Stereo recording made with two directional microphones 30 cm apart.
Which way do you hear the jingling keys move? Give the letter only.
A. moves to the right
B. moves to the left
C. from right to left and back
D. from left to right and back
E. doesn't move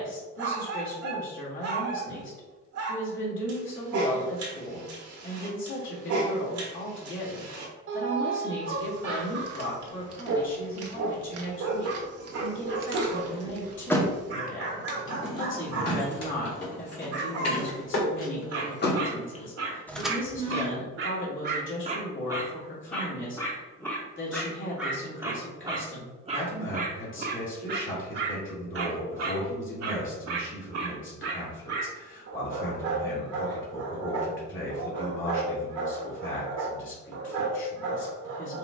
C.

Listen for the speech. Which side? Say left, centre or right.
left.